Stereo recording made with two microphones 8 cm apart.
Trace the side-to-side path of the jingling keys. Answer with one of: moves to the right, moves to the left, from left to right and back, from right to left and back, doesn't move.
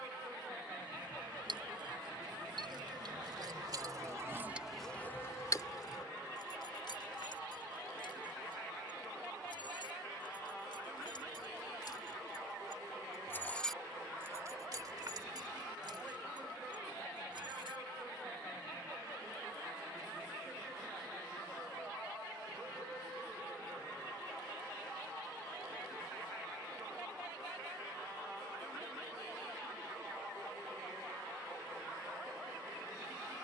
from right to left and back.